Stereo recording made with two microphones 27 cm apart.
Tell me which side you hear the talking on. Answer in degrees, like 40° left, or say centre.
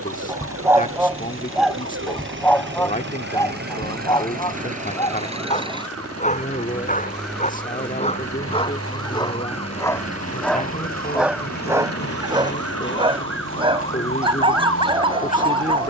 30° left.